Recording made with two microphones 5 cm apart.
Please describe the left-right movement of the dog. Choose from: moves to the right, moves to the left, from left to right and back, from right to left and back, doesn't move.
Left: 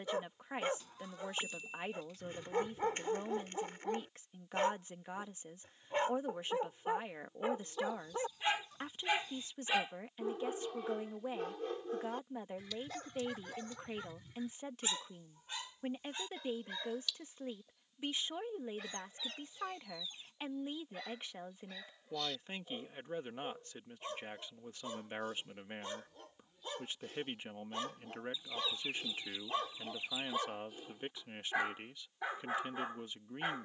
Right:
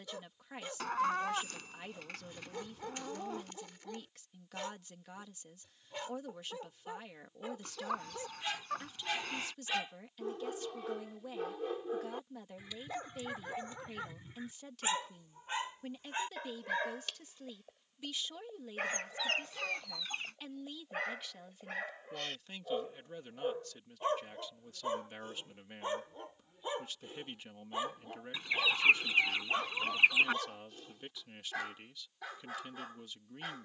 from left to right and back.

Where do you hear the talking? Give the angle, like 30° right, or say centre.
30° left.